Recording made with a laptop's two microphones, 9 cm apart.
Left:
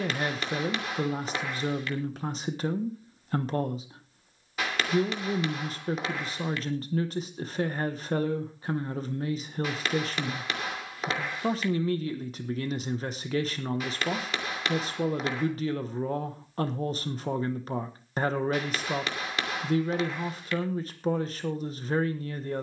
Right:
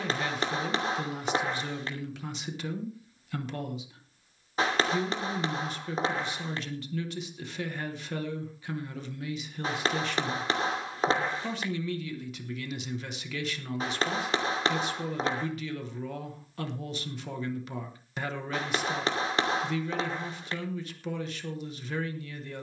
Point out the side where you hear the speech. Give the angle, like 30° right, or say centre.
40° left.